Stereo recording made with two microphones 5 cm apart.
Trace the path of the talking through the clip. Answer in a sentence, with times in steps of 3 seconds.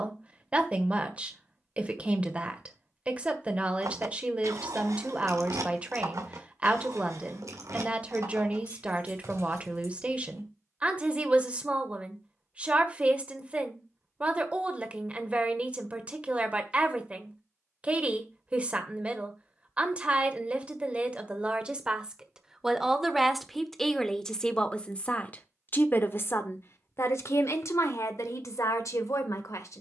You can hear the talking on the right from 0 s, in the centre from 21 s and on the left from 24 s.